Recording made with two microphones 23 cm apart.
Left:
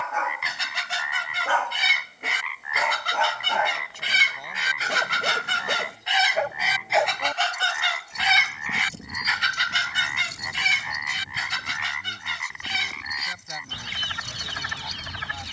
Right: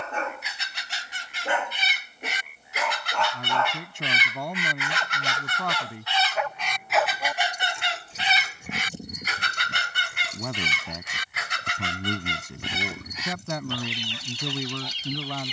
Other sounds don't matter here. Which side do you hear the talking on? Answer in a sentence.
In this clip you hear the talking on the right.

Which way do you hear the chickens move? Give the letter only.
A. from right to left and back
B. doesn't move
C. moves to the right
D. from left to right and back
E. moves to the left
C.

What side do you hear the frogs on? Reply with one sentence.
You can hear the frogs on the left.